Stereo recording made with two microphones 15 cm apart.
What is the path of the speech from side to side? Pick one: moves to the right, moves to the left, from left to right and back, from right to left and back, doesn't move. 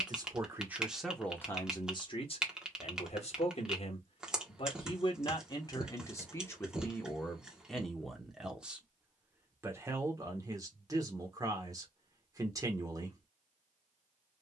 from right to left and back.